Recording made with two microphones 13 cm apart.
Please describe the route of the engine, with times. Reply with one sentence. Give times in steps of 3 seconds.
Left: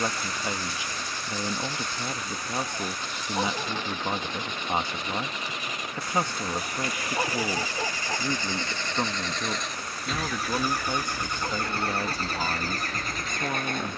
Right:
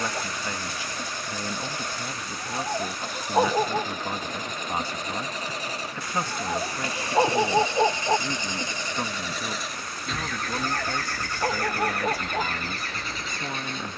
In this clip you hear the engine on the right from 0 s, in the centre from 9 s and on the left from 12 s.